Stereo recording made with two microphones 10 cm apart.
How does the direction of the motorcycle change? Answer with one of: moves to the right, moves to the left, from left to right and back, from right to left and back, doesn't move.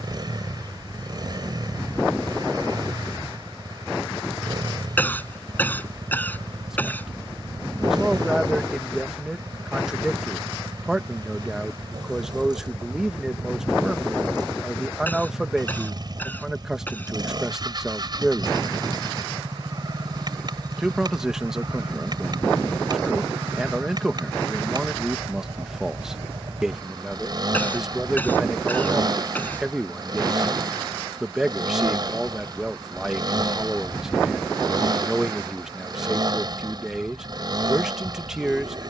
doesn't move.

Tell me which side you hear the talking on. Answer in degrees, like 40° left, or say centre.
10° right.